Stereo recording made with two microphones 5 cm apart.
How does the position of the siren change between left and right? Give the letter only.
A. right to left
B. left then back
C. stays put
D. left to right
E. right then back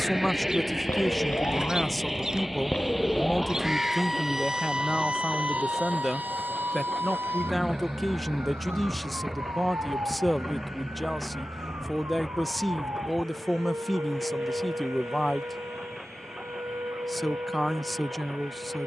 D.